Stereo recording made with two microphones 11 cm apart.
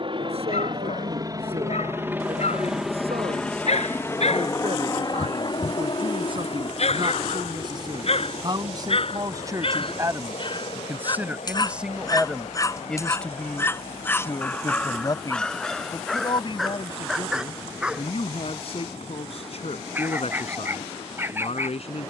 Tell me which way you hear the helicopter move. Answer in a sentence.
In this clip you hear the helicopter move to the left.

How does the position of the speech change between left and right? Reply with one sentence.
You can hear the speech move from right to left.